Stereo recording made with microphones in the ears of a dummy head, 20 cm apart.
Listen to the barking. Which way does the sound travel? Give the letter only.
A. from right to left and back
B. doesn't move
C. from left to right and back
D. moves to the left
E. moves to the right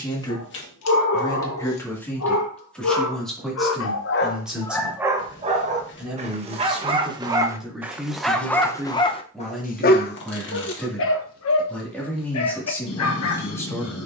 C.